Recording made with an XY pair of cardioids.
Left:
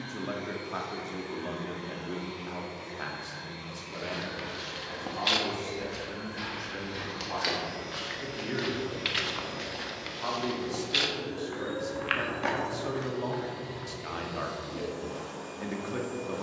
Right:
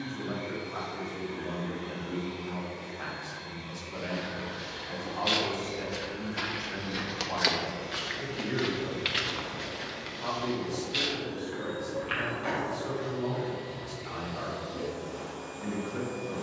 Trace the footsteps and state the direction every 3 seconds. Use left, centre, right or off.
off, left, right, left, left, off.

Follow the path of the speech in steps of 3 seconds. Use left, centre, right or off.
left, centre, centre, left, left, left.